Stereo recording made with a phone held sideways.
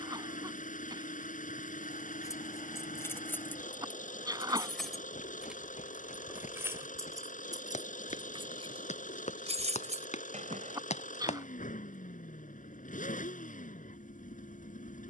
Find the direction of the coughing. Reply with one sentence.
You can hear the coughing on the right.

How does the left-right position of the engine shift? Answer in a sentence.
You can hear the engine stay in one place.